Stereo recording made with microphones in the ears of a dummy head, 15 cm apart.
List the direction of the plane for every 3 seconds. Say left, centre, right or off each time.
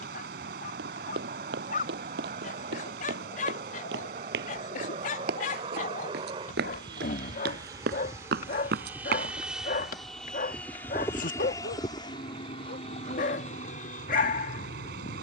right, right, right, centre, left.